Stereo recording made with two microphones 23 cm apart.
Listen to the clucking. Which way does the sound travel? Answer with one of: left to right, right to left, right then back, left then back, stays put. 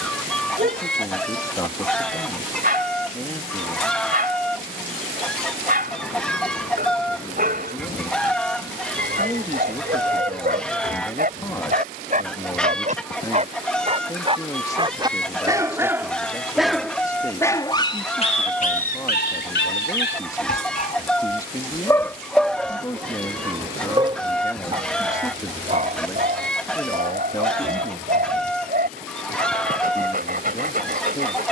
stays put.